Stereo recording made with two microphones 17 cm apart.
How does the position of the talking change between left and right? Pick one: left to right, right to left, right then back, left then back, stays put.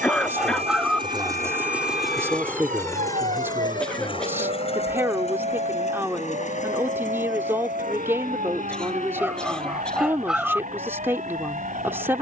stays put.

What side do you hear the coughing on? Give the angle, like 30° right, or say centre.
10° left.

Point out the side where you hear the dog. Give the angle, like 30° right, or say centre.
centre.